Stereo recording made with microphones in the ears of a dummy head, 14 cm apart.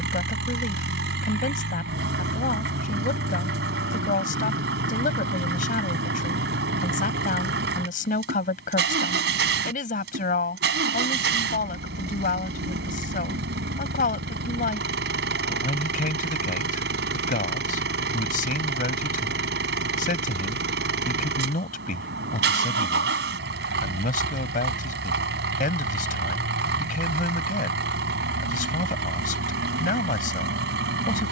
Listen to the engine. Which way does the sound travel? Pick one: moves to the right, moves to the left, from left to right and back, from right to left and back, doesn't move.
doesn't move.